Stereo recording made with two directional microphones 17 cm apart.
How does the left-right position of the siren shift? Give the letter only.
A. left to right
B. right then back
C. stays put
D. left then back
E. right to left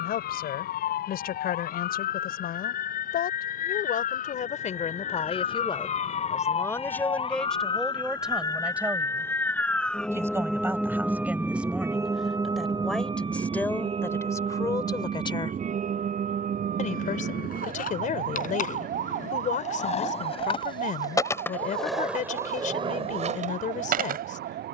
A.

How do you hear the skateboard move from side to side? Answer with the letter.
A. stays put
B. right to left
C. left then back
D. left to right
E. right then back
D.